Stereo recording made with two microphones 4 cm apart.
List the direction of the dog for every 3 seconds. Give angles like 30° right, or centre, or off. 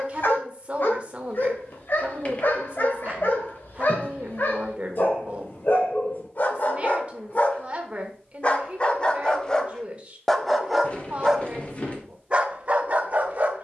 50° left, 50° left, 40° left, centre, 40° right.